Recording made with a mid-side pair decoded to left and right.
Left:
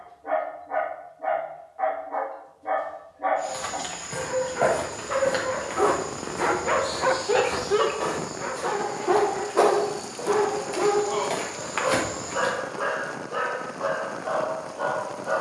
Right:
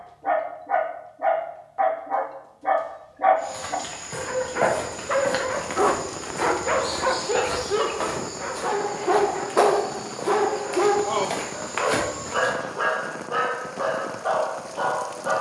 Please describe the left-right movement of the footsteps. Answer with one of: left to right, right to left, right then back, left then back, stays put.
right then back.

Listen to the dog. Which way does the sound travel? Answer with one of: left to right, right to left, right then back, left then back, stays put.
left then back.